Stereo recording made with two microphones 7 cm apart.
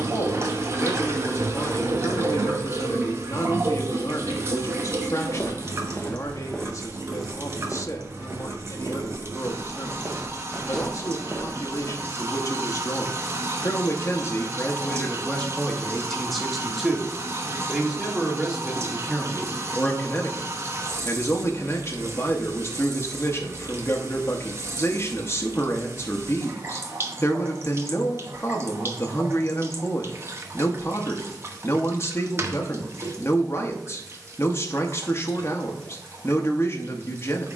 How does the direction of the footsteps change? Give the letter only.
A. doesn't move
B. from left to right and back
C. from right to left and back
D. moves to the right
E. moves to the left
B.